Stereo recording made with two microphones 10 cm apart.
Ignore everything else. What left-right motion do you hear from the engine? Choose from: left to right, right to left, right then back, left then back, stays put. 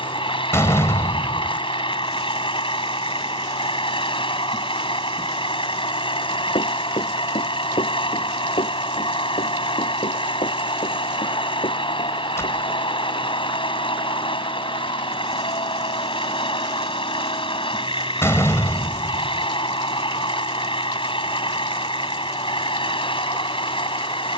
stays put.